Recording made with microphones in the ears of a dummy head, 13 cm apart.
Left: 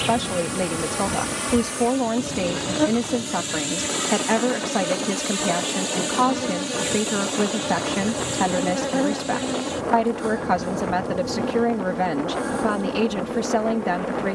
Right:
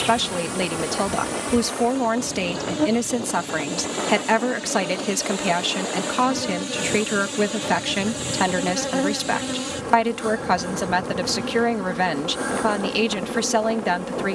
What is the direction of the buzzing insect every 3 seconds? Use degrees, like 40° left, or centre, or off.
10° left, 20° left, centre, 20° right, 30° right.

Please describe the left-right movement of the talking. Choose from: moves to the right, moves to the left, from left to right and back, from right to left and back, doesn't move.
doesn't move.